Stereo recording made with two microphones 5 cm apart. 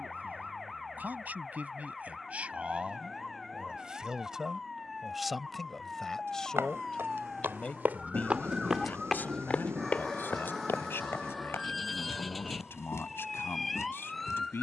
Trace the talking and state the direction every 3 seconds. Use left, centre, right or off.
right, centre, left, left, left.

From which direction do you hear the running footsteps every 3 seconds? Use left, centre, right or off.
off, off, right, left, left.